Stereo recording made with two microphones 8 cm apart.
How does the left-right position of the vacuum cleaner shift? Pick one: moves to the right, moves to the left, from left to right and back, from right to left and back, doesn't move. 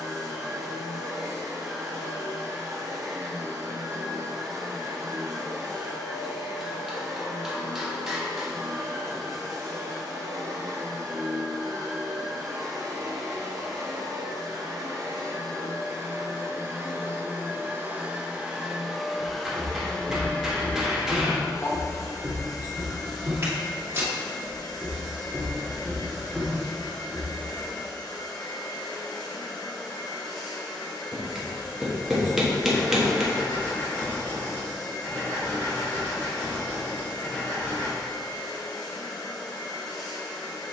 moves to the left.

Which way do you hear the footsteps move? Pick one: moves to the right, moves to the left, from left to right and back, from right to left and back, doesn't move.
from left to right and back.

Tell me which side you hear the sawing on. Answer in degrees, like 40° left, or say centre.
30° left.